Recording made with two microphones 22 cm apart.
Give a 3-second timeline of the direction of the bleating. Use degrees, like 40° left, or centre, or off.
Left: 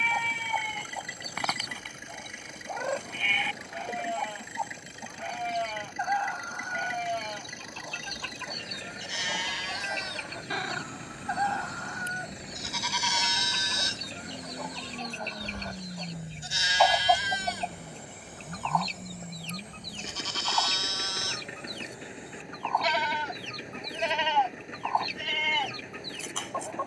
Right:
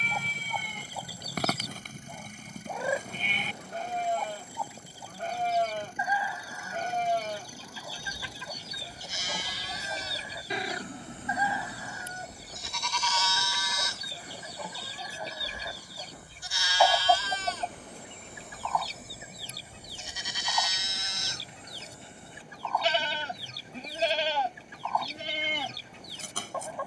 40° right, 40° right, 40° right, 30° right, 20° left, 20° left, 10° right, 30° right, 40° right.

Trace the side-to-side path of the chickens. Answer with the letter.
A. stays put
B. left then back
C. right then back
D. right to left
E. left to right
A.